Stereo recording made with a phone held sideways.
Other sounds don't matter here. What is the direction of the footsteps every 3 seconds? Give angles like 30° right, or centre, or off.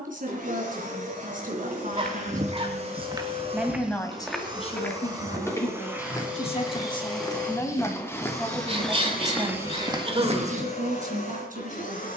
50° right, centre, 20° left, 30° right.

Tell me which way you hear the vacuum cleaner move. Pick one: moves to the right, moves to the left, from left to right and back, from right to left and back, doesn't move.
moves to the left.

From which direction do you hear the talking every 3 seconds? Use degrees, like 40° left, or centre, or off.
50° right, 30° left, 10° left, 40° right.